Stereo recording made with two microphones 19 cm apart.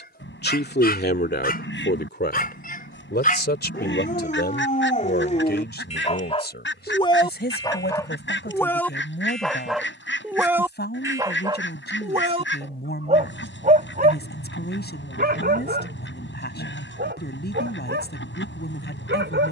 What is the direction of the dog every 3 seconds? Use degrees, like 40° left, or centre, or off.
50° left, 40° left, 20° left, 10° right, 40° right, 60° right, 70° right.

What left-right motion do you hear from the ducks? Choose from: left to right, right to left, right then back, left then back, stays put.
stays put.